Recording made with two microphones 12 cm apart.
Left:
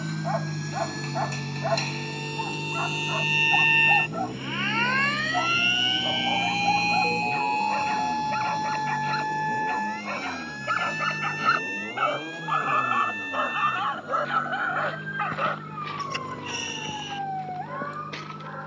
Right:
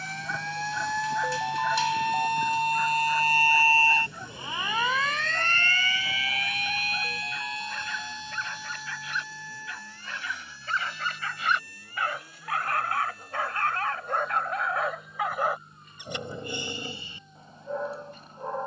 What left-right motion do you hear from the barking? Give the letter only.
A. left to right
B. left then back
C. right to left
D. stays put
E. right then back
A.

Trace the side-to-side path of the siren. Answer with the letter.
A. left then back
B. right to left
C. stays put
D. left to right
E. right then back
B.